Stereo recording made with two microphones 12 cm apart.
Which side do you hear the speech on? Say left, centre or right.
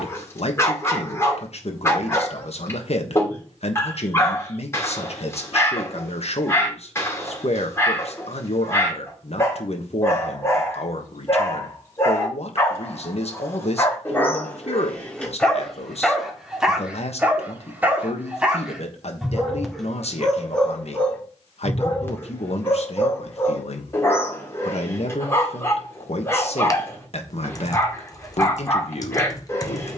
left.